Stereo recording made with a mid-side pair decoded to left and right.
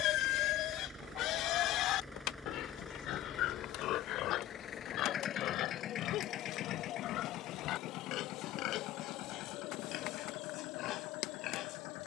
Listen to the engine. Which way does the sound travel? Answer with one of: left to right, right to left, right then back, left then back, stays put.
right to left.